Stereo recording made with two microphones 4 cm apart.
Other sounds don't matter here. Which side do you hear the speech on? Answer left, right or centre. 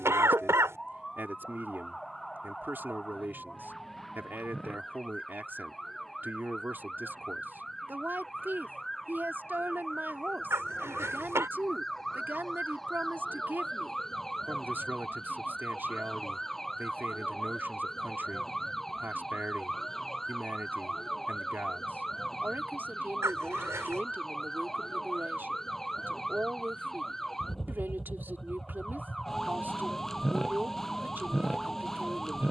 right.